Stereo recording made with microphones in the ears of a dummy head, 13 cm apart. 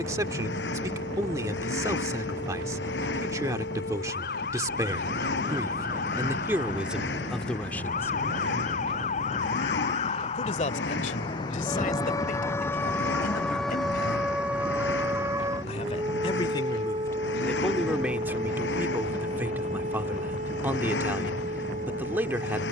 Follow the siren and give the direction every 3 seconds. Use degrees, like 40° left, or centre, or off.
70° left, 70° left, 60° left, 40° left, centre, 30° right, 50° right, 60° right.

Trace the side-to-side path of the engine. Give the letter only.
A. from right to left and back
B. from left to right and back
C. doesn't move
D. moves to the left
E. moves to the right
C.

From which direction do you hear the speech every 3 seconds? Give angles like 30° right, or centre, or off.
20° right, 20° right, centre, 50° left, 60° left, 20° left, 10° right, 10° right.